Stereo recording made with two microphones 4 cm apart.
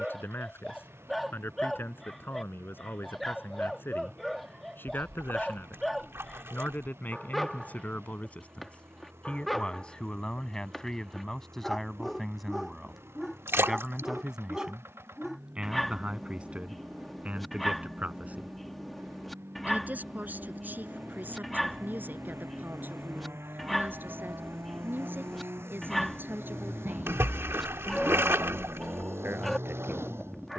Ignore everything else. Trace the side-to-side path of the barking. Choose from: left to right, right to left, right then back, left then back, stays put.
stays put.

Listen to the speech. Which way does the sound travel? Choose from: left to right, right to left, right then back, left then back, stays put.
left to right.